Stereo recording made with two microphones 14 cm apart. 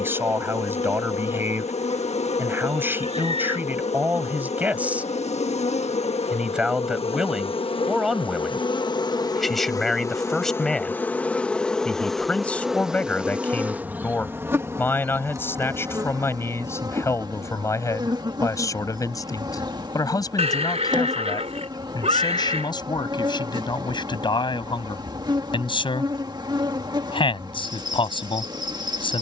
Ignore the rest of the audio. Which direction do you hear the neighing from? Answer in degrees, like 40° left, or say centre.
50° right.